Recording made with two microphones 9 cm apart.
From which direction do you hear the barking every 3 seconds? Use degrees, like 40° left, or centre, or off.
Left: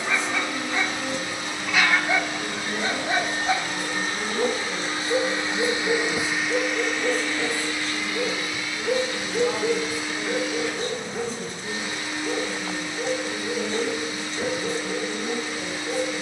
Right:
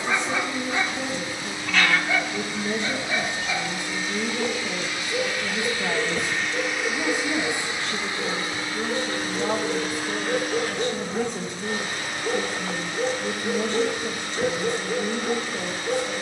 10° left, 50° left, 70° left, 10° left, 20° right, 20° right.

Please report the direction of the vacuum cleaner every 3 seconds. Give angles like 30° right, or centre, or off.
70° left, 40° left, 20° right, 50° right, 60° right, 60° right.